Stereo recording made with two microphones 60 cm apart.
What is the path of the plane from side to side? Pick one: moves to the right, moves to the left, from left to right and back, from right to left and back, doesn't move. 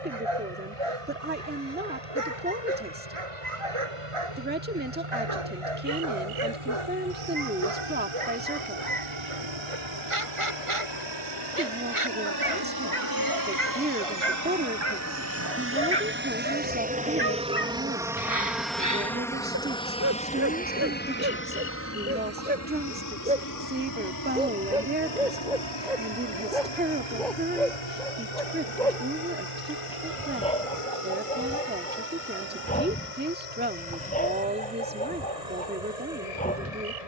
moves to the left.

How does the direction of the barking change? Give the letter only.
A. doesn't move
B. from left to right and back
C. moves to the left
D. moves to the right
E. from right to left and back
C.